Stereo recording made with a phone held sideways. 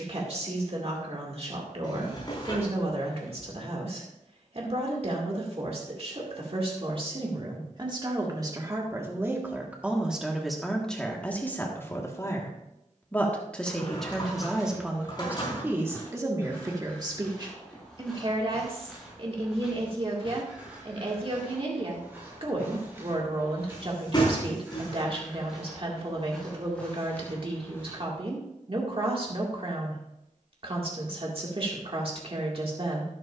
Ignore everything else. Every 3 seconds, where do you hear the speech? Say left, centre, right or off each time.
right, right, right, centre, centre, right, right, right, right, right, right.